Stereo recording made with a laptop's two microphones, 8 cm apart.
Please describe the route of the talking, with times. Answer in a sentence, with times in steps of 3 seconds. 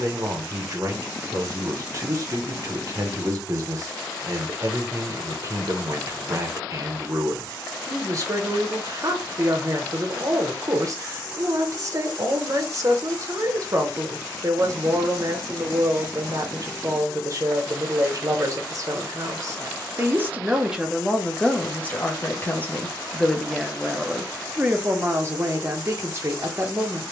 You can hear the talking on the right from 0 s, in the centre from 21 s and on the right from 24 s.